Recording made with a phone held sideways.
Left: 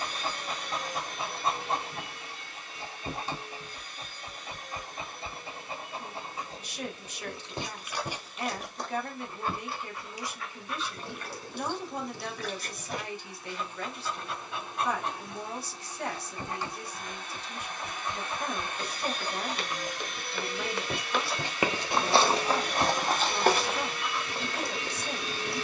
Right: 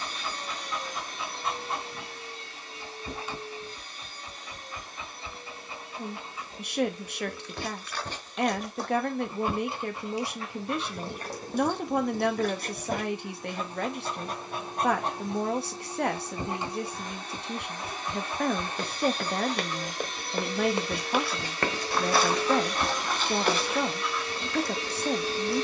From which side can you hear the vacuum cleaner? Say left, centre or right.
right.